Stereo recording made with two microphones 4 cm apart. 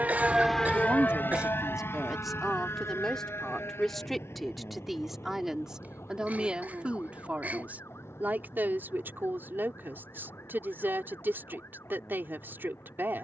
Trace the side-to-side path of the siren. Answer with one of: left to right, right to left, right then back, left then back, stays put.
right to left.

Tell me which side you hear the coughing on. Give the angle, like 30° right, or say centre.
40° right.